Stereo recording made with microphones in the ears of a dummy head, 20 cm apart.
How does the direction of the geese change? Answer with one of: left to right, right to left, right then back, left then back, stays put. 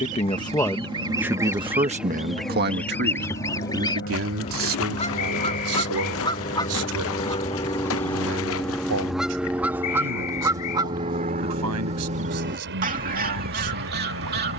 left then back.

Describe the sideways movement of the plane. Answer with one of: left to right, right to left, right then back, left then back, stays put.
left to right.